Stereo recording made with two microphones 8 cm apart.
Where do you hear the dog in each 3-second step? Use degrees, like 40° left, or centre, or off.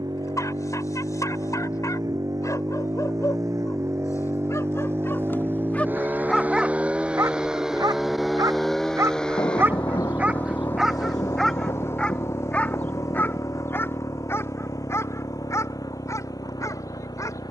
50° left, 40° left, 30° right, 10° right, 30° left, 40° left.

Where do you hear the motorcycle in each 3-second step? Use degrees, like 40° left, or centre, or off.
50° right, 40° right, 10° right, 20° left, 40° left, 50° left.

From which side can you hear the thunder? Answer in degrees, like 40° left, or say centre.
50° left.